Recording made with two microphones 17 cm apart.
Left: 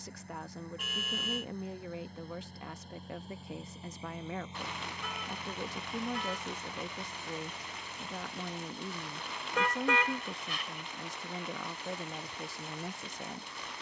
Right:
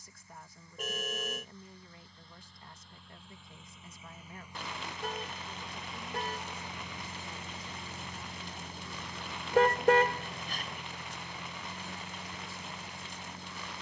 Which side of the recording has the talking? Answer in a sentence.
In this clip you hear the talking on the left.